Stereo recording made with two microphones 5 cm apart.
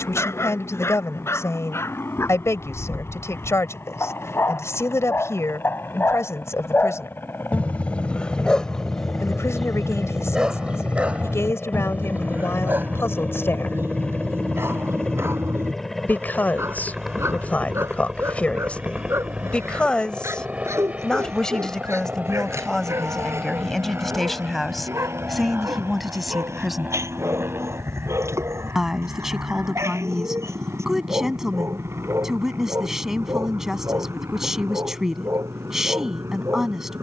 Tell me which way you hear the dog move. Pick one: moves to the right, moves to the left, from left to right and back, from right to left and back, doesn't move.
moves to the right.